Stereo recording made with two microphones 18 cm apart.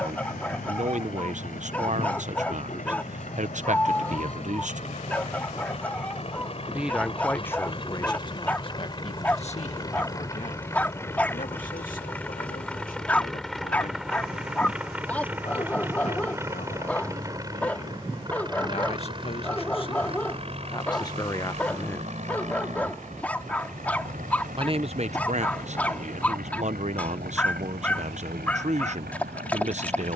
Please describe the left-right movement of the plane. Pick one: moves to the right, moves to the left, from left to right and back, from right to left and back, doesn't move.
moves to the right.